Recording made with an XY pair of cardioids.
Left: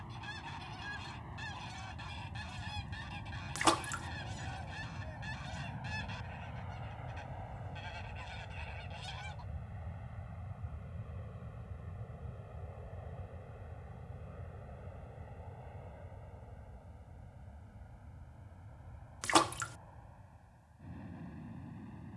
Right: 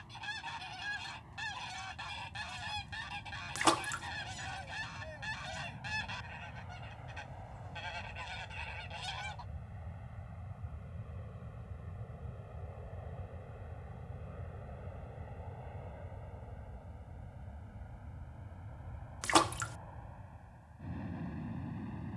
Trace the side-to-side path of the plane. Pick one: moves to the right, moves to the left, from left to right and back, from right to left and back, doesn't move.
moves to the right.